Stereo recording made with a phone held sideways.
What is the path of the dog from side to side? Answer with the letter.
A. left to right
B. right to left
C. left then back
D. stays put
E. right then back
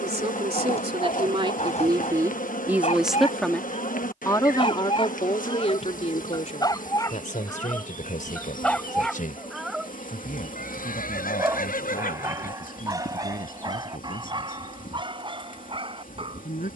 A.